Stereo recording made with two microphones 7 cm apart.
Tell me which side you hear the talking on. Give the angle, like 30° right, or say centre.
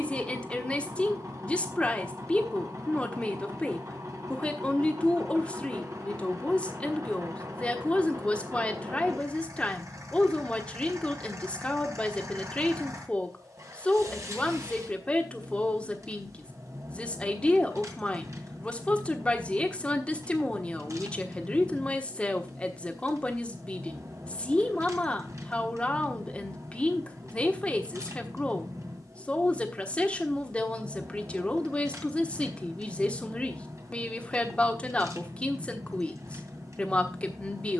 20° left.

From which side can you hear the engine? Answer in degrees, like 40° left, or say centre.
50° right.